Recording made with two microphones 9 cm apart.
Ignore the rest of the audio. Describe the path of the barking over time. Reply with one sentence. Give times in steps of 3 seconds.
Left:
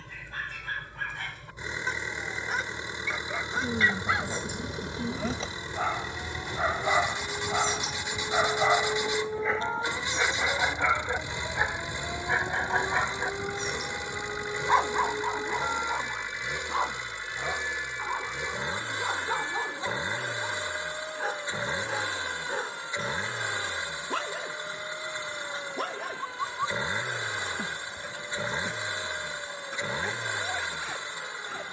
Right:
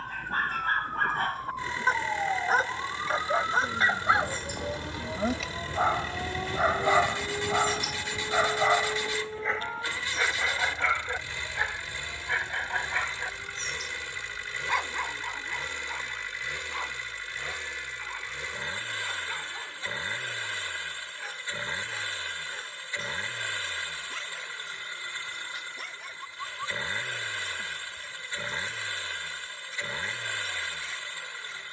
You can hear the barking on the right from 0 s, in the centre from 6 s and on the left from 12 s.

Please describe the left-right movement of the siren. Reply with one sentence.
You can hear the siren move to the left.